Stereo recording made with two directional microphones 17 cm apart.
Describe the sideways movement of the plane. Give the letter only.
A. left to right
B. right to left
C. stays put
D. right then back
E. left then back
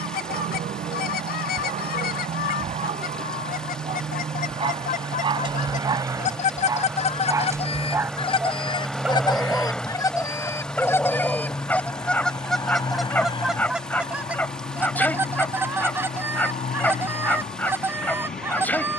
B.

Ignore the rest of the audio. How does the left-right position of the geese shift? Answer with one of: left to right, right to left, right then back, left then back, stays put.
left to right.